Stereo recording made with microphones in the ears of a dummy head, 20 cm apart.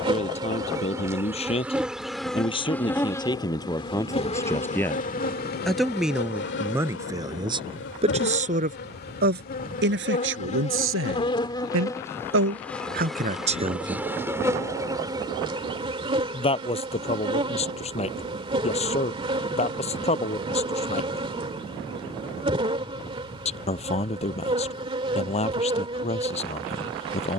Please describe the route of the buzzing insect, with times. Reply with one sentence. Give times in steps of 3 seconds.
In this clip you hear the buzzing insect in the centre from 0 s, on the left from 3 s, in the centre from 12 s and on the right from 15 s.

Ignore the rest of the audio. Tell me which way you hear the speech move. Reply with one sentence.
In this clip you hear the speech move from left to right and back again.